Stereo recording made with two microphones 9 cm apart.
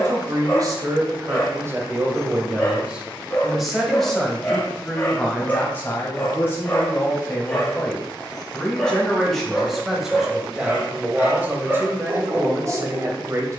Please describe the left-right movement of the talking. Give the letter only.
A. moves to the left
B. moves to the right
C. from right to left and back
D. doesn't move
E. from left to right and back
C.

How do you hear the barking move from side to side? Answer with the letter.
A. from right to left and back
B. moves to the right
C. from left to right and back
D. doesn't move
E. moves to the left
B.